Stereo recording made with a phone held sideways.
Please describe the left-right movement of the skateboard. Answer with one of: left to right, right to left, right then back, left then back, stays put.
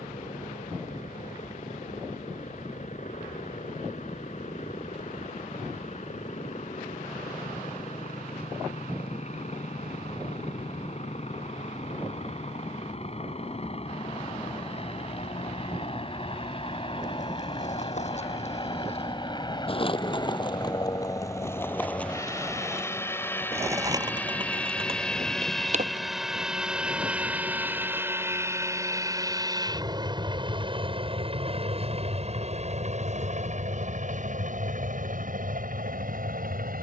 left to right.